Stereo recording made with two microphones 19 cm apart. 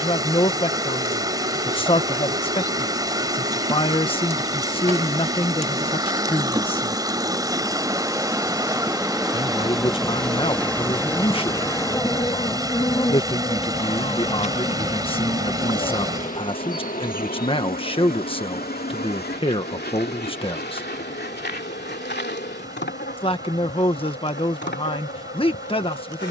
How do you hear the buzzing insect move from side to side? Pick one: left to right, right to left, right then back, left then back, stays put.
right to left.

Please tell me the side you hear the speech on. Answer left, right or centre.
left.